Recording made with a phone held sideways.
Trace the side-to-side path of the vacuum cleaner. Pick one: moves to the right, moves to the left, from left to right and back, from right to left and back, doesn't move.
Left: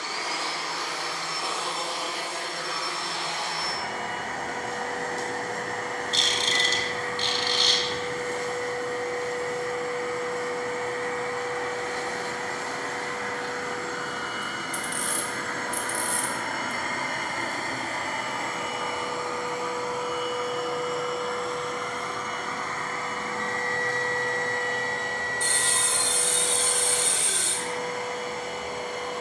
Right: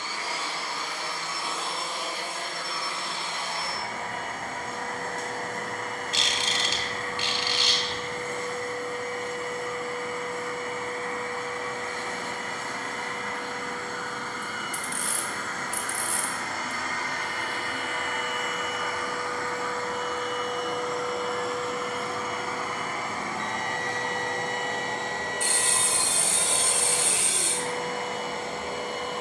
moves to the right.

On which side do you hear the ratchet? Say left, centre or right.
centre.